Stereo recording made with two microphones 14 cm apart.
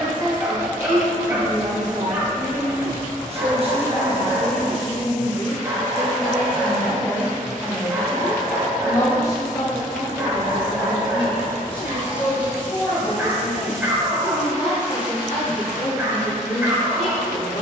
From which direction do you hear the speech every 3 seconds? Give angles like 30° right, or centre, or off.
60° right, 30° right, centre, 30° left, 40° left, 50° left.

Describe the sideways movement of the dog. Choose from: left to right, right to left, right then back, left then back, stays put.
stays put.